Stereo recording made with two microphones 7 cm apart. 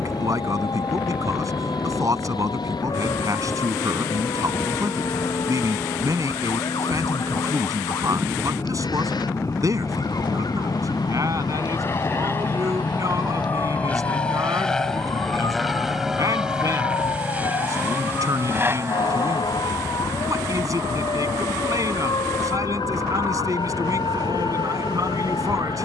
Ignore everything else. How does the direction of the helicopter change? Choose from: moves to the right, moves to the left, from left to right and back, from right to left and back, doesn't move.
moves to the right.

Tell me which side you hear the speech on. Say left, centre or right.
right.